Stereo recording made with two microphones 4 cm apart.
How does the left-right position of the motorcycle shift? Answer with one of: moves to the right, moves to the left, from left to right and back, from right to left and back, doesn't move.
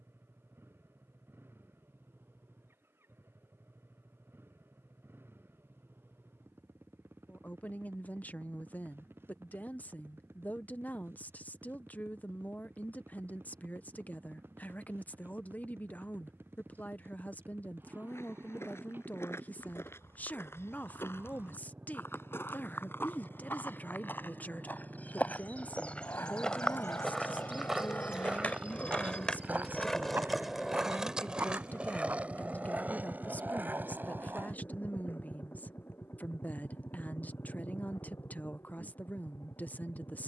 moves to the left.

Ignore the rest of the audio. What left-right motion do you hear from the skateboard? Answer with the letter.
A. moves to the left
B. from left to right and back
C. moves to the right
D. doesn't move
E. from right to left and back
C.